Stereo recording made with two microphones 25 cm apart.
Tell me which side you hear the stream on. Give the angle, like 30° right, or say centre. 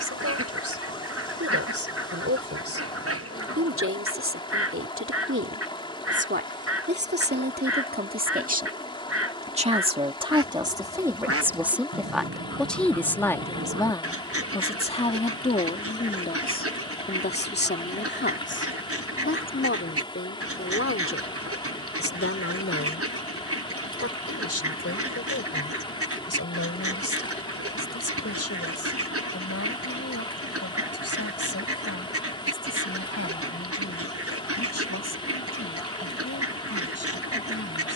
20° left.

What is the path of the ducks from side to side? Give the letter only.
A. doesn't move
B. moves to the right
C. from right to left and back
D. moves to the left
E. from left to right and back
A.